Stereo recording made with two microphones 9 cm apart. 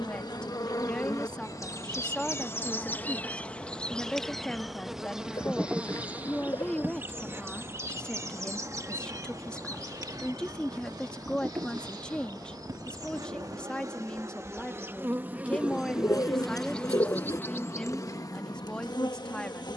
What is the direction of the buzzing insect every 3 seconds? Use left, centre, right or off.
left, centre, right, right, right, centre, left.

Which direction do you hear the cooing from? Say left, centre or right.
left.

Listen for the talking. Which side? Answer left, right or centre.
centre.